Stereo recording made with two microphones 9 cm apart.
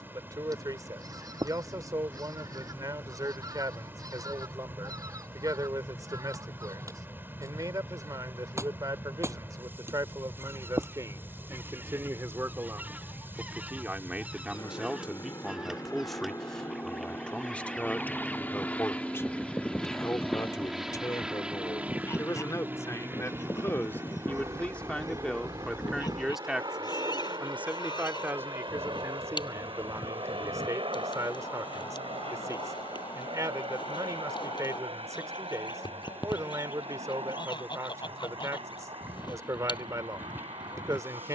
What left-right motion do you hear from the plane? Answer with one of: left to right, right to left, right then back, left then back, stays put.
left to right.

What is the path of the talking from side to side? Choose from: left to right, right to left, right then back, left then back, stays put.
left then back.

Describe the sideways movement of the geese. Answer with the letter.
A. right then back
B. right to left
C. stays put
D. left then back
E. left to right
B.